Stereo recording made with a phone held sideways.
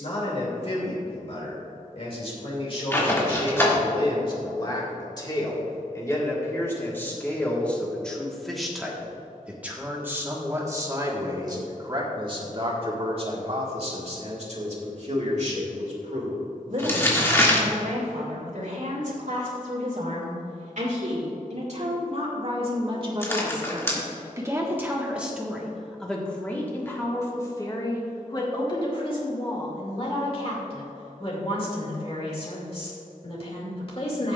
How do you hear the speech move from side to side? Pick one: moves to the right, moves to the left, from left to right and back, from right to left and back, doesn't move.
from left to right and back.